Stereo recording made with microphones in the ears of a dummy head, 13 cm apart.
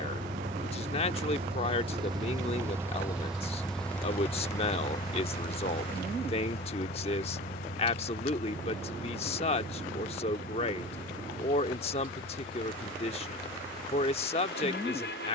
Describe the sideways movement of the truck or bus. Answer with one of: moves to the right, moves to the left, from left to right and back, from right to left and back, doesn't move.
moves to the left.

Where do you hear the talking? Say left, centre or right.
left.